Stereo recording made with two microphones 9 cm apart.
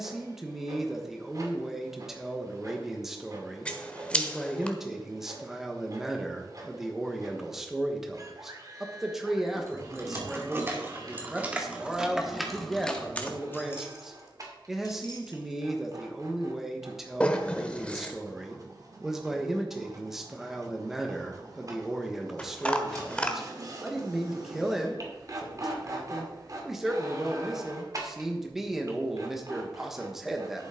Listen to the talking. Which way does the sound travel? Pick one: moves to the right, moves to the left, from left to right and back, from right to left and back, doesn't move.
doesn't move.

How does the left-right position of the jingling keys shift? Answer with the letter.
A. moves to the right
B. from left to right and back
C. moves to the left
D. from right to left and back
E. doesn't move
C.